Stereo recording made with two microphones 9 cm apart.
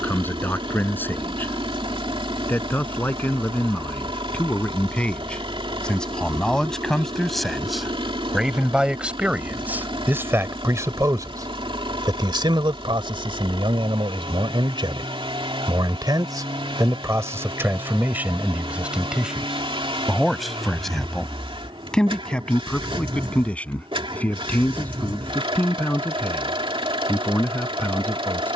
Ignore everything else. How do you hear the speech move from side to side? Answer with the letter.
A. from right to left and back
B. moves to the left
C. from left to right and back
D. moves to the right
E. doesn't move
C.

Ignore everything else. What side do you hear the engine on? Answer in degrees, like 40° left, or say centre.
70° right.